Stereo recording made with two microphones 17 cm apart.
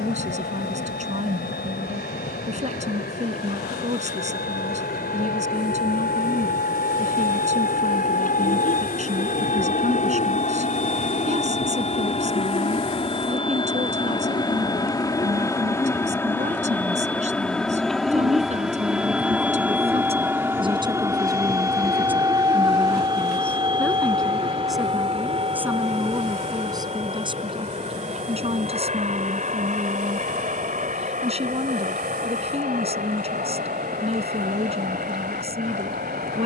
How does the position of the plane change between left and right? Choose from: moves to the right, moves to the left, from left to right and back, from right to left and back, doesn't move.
moves to the right.